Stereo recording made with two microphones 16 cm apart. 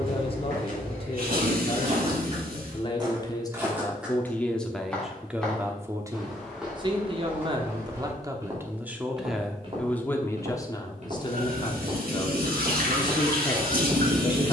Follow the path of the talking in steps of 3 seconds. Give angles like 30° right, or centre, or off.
40° left, 10° left, 30° right, 20° left, 30° left.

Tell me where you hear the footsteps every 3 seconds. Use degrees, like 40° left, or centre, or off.
60° right, 10° right, 10° right, 40° right, 70° right.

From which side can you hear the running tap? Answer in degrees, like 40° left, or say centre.
70° right.